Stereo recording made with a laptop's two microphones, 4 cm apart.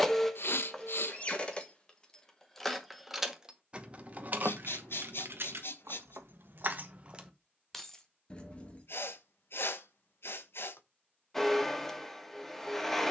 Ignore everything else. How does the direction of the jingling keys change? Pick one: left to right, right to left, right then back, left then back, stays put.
right then back.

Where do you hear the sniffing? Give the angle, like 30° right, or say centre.
60° left.